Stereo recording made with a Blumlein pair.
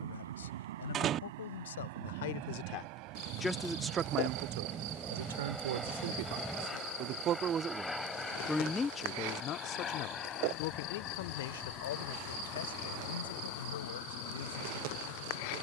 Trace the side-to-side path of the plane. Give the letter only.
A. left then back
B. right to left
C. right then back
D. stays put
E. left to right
B.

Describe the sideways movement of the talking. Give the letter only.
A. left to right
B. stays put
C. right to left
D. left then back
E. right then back
E.